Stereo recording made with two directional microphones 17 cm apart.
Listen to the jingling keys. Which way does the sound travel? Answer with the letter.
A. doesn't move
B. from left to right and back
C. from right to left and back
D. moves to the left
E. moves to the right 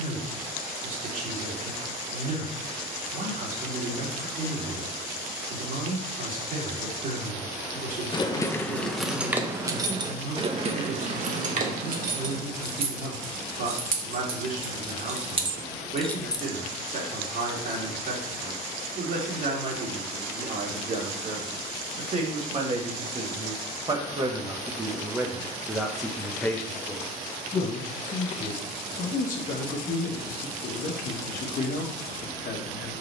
B.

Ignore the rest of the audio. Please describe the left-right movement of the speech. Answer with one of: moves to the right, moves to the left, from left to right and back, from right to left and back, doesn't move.
moves to the left.